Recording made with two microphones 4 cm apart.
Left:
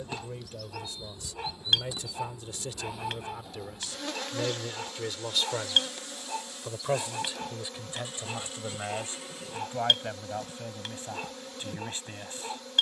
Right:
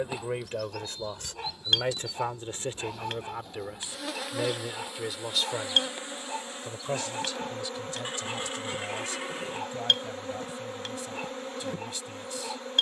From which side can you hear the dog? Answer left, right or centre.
centre.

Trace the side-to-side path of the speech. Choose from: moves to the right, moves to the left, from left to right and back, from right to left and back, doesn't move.
moves to the left.